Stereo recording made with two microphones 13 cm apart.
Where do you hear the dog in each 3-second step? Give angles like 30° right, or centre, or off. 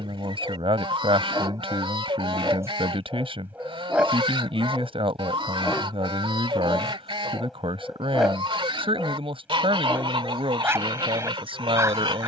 30° right, centre, centre, 20° right.